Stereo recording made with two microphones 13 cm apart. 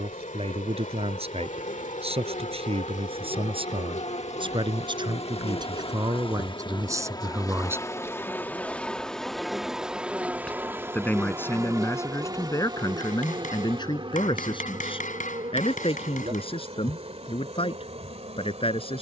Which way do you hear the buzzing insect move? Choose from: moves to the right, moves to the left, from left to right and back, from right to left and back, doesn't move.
moves to the right.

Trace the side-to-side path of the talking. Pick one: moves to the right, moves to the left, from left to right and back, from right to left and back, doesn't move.
moves to the left.